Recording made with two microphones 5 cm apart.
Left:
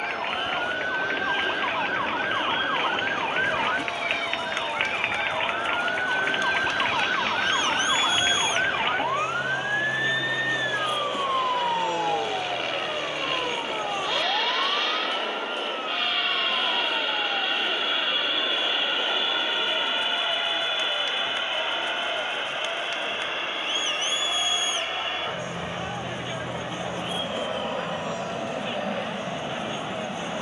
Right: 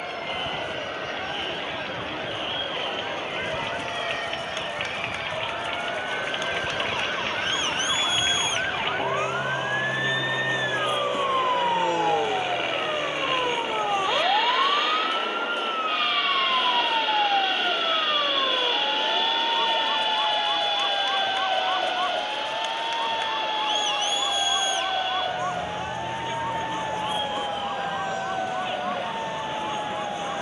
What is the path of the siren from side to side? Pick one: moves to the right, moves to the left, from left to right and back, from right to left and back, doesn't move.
moves to the right.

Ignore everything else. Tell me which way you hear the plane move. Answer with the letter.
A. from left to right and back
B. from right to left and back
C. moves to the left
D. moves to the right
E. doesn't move
C.